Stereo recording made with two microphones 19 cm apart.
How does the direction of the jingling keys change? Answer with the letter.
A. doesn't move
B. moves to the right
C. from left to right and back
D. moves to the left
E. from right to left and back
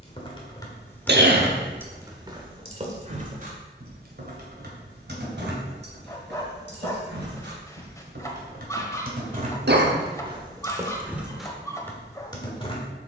C.